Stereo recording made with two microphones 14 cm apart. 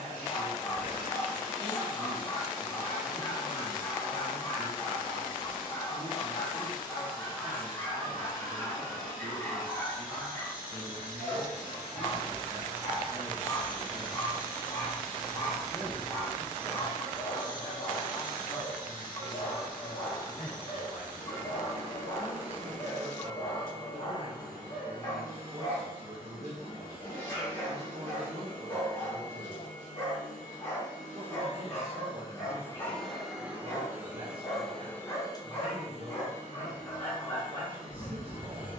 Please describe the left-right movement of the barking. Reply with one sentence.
In this clip you hear the barking stay put.